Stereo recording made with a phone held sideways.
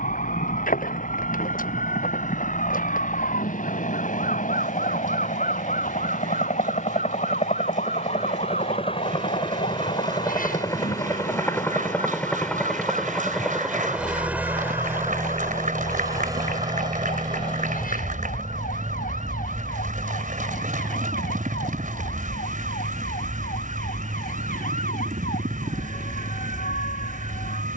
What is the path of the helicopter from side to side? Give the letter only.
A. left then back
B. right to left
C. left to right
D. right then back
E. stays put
C.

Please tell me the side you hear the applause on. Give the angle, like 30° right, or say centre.
70° right.